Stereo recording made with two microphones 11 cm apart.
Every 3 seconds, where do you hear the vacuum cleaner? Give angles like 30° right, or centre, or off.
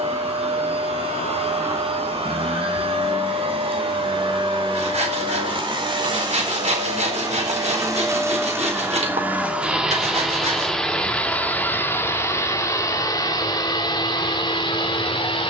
60° right, 50° right, 30° right, centre, 40° left.